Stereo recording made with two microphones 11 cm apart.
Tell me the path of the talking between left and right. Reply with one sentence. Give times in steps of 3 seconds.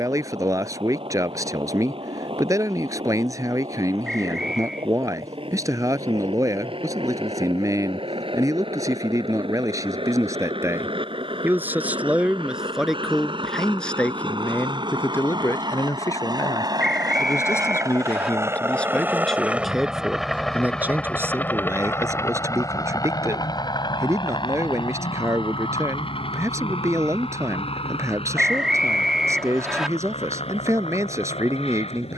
In this clip you hear the talking on the right from 0 s, in the centre from 12 s, on the left from 15 s, in the centre from 18 s and on the right from 21 s.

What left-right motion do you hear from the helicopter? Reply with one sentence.
In this clip you hear the helicopter travel towards the left.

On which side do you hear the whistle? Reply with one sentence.
In this clip you hear the whistle in the centre.